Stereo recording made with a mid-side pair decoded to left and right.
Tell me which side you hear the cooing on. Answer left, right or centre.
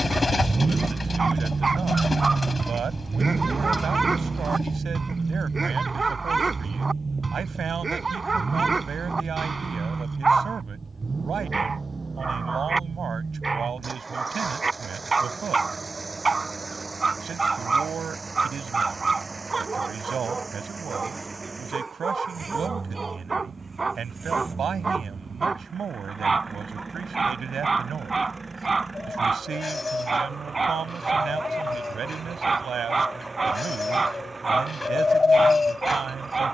left.